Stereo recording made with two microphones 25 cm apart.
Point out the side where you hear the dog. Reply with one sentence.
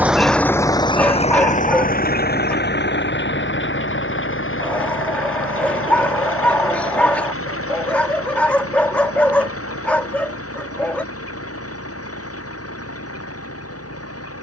You can hear the dog in the centre.